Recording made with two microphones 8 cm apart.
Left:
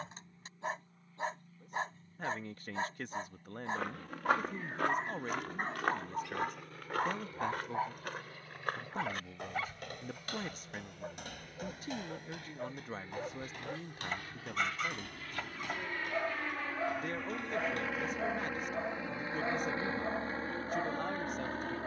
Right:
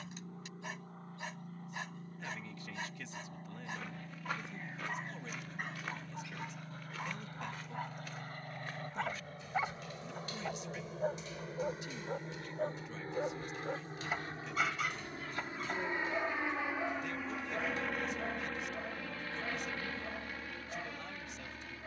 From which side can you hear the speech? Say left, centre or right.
left.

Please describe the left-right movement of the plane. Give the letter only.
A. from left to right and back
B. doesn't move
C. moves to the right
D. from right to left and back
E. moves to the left
E.